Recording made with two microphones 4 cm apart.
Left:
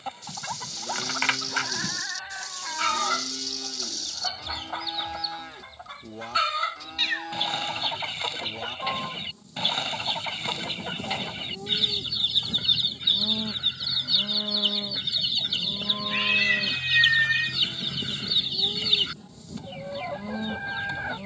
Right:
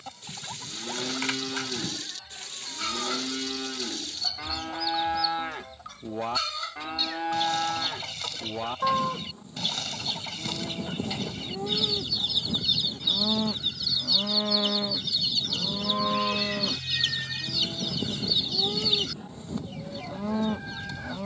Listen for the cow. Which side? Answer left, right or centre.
right.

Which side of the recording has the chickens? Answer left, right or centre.
left.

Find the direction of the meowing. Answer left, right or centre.
left.